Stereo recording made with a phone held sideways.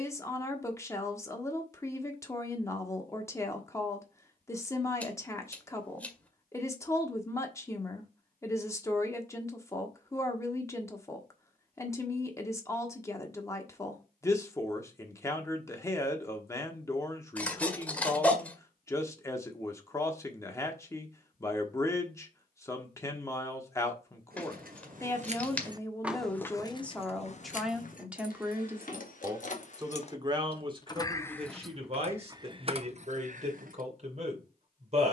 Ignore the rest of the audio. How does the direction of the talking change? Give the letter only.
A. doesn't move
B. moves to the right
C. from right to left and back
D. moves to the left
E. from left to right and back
B.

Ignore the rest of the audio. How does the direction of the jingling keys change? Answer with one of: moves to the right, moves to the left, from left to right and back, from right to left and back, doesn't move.
from right to left and back.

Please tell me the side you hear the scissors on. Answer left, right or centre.
centre.